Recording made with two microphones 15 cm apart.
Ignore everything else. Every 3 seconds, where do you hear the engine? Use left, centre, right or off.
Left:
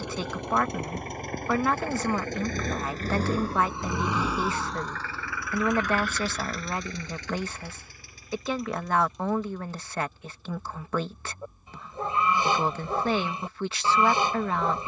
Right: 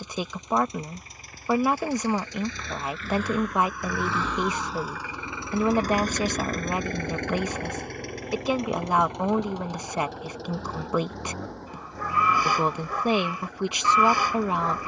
left, centre, right, right, right.